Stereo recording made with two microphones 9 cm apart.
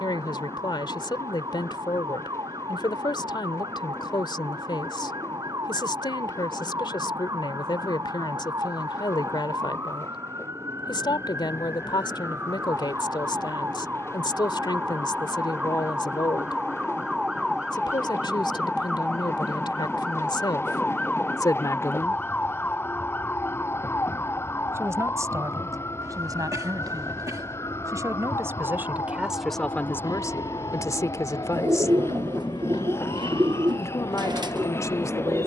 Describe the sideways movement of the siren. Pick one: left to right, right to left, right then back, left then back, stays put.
right to left.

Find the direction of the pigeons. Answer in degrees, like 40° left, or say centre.
50° right.